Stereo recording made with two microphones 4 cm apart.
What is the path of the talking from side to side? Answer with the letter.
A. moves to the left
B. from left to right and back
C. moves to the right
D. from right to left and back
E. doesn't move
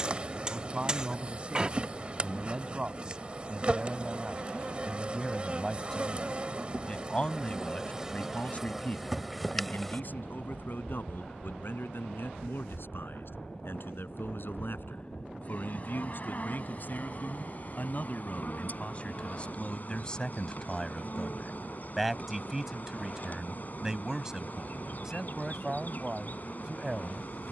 D.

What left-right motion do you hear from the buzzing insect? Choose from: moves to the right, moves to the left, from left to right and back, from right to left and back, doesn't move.
moves to the left.